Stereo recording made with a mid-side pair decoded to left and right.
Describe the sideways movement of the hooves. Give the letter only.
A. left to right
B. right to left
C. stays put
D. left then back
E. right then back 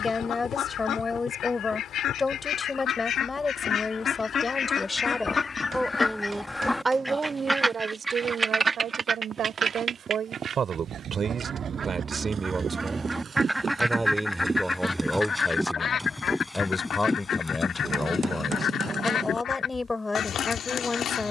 B.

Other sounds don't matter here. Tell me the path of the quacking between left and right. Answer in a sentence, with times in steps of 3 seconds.
In this clip you hear the quacking on the left from 0 s, in the centre from 6 s, on the right from 9 s, in the centre from 12 s and on the left from 15 s.